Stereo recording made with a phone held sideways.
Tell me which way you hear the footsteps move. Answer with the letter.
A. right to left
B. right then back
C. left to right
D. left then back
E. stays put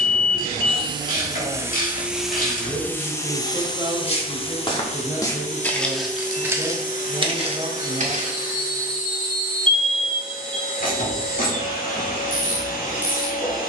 C.